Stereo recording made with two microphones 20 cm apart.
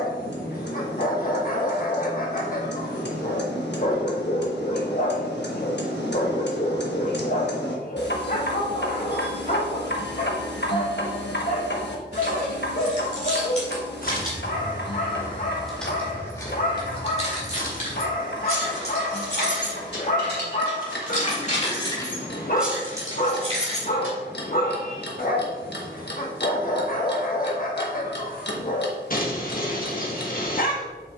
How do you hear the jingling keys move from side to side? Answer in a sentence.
In this clip you hear the jingling keys move from right to left and back again.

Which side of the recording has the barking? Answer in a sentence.
You can hear the barking on the left.